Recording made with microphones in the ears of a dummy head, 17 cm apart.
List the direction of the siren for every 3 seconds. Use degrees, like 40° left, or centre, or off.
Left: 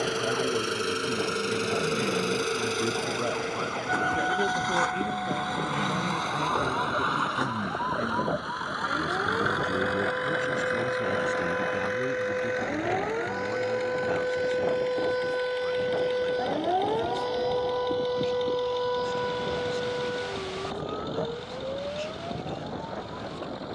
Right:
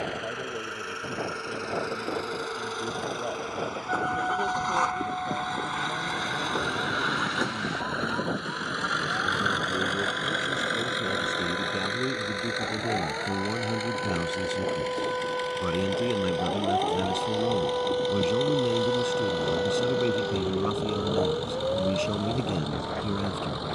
70° left, 60° left, 60° left, 50° left, 40° left, 10° left, 20° right, 40° right.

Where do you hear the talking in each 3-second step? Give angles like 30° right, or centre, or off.
20° left, 20° left, 20° left, centre, 30° right, 70° right, 70° right, 70° right.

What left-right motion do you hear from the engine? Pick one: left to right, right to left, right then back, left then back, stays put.
left to right.